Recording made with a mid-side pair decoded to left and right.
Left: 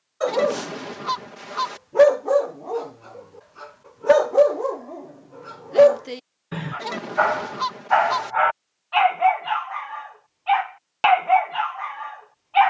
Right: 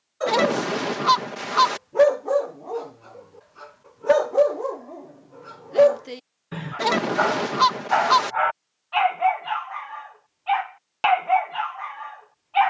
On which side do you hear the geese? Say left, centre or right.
right.